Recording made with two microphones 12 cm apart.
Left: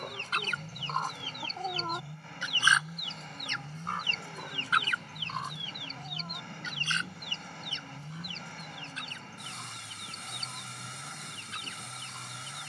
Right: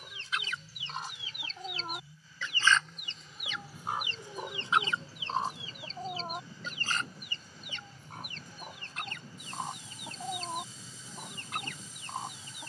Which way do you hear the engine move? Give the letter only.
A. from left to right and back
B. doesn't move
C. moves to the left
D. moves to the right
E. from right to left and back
B.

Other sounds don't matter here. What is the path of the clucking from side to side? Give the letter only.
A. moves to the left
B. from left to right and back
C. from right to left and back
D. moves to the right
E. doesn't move
D.